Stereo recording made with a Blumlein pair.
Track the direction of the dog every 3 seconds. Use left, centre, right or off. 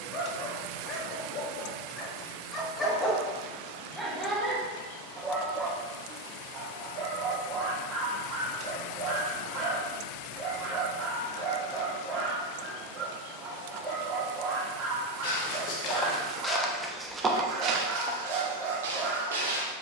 left, centre, right, right, right, right, right.